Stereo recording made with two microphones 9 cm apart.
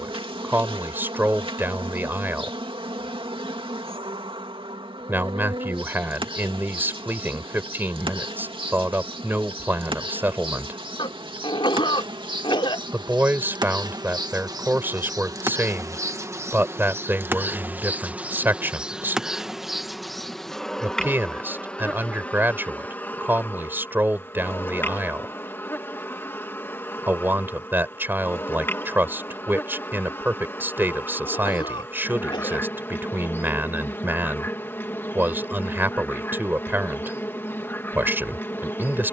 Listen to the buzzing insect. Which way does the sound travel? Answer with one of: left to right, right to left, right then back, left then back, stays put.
right to left.